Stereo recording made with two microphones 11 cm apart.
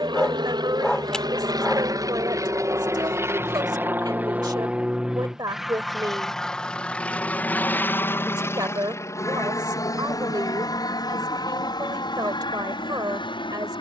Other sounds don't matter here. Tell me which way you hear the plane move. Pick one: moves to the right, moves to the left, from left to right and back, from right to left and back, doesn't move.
moves to the left.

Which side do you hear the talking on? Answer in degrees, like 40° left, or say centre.
40° right.